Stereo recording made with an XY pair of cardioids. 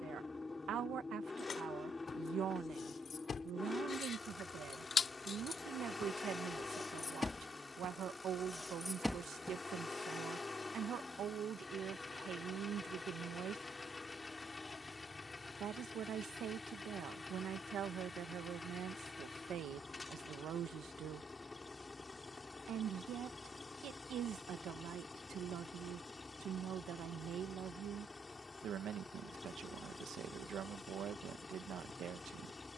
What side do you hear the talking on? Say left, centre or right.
right.